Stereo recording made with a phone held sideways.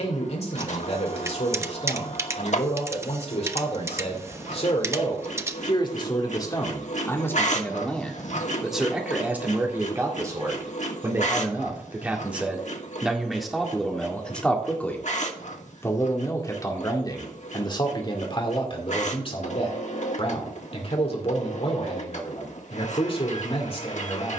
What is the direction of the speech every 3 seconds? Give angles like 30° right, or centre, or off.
50° left, 50° left, 10° left, 20° right, centre, 30° left, 40° left, 50° left.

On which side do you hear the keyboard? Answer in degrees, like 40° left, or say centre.
20° right.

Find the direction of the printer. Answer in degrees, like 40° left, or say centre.
60° left.